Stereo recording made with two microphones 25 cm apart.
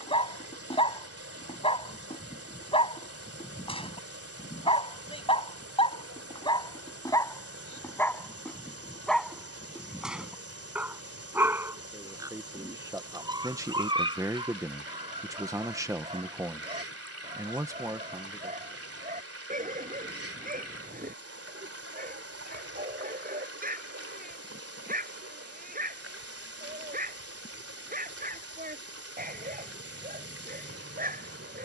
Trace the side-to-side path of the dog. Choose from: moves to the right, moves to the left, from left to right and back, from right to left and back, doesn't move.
moves to the right.